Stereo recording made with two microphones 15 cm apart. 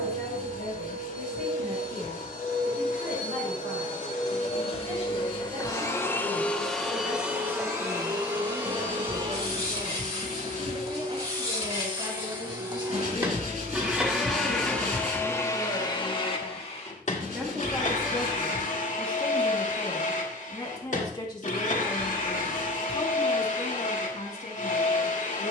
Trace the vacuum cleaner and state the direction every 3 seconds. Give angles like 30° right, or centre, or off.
70° left, 50° left, 10° right, 40° right, 10° right, 40° left, 60° left, 60° left, 60° left.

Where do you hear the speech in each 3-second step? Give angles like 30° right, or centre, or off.
60° right, 60° right, 50° right, 40° right, 30° right, 10° right, 10° left, 40° left, 50° left.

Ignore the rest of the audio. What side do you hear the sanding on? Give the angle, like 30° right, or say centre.
60° right.